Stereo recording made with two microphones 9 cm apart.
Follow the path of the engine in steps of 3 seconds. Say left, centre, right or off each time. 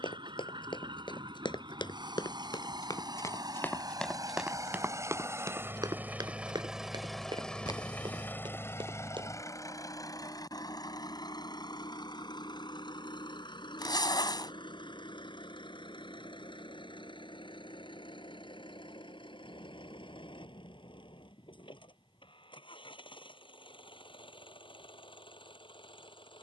right, right, centre, left, left, left, left, left, left.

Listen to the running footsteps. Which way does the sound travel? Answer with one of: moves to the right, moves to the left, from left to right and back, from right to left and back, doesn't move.
moves to the right.